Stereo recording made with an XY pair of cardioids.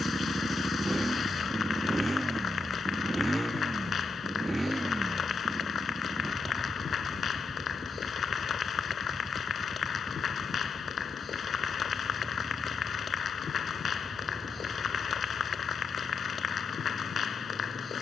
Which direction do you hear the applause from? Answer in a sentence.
In this clip you hear the applause on the left.